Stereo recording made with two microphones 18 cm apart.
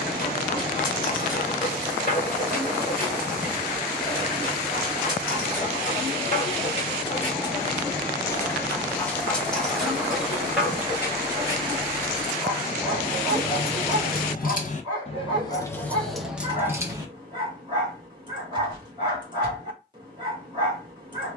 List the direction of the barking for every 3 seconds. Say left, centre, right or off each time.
left, left, left, centre, right, right, right.